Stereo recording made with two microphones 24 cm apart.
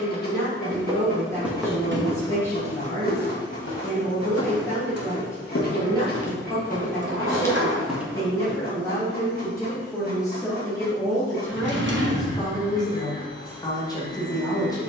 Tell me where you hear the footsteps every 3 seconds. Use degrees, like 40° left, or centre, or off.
centre, 60° left, 20° left, off, off.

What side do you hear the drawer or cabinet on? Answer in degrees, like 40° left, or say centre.
50° right.